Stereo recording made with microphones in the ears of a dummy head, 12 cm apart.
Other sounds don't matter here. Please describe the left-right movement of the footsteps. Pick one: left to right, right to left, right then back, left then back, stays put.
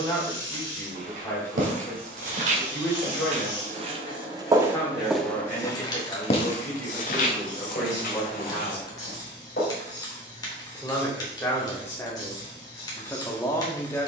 right to left.